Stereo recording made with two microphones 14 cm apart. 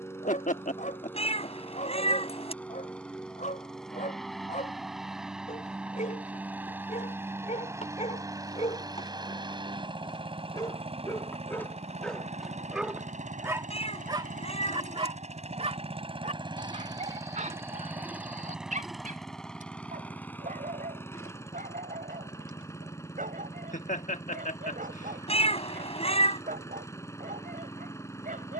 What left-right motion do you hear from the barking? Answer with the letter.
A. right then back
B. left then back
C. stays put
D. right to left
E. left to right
E.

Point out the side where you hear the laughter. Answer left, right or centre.
left.